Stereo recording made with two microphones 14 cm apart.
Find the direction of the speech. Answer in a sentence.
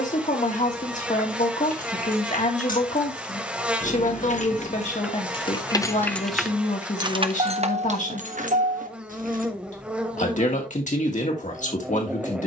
You can hear the speech on the left.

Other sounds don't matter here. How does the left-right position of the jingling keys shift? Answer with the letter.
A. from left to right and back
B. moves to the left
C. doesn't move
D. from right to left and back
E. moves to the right
E.